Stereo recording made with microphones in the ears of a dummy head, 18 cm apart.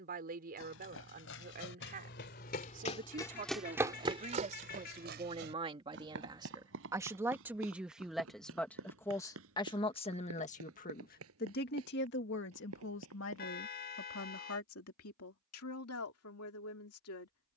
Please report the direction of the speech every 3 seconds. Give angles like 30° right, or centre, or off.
40° right, 30° right, 10° right, 40° left, 70° left, 80° left.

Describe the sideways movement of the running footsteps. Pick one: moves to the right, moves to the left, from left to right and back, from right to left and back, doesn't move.
moves to the right.